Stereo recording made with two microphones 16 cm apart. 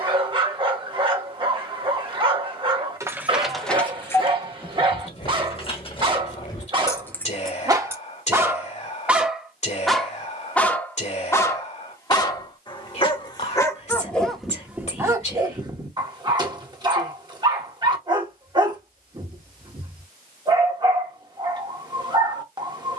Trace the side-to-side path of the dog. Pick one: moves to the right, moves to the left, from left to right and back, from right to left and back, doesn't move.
from right to left and back.